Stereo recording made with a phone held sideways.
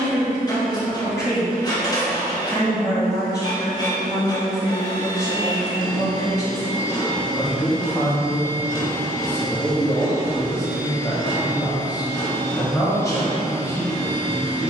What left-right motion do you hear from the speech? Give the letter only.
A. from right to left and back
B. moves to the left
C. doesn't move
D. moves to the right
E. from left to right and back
C.